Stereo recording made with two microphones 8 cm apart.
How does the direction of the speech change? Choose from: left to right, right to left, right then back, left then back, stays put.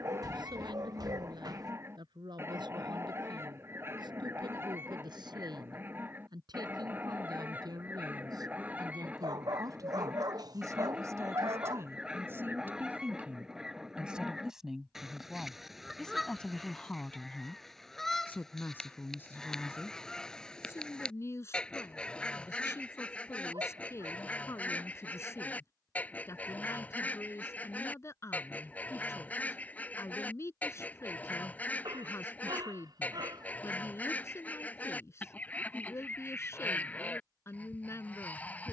right to left.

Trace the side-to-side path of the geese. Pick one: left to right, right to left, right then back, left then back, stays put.
right to left.